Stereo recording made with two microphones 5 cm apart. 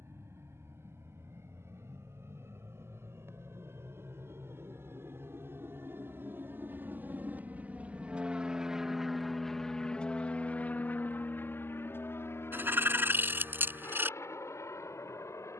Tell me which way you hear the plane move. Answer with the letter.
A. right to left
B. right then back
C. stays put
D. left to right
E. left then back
A.